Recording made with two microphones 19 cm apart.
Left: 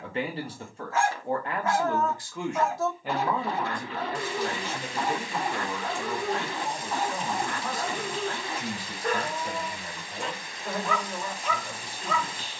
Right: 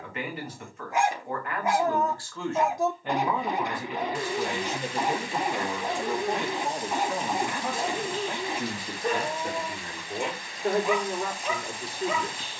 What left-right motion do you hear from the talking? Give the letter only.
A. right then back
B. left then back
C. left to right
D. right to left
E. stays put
C.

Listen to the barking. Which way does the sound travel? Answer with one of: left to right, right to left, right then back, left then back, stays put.
stays put.